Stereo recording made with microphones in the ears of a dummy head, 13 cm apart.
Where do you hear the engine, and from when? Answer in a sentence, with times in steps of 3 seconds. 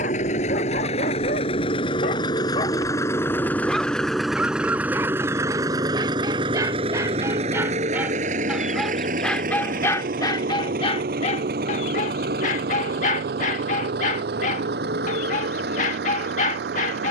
In this clip you hear the engine on the left from 0 s, in the centre from 3 s and on the right from 6 s.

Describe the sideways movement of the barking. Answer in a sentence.
In this clip you hear the barking move from left to right and back again.